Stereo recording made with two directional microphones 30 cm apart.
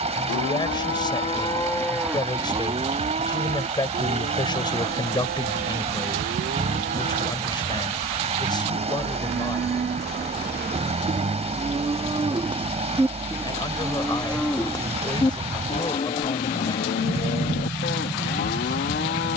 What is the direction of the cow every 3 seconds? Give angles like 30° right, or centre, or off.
10° left, 40° right, 50° right, 30° right, 10° right, 30° left, 40° left.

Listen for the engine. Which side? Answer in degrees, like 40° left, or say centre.
20° right.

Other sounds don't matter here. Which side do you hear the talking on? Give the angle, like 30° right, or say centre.
10° left.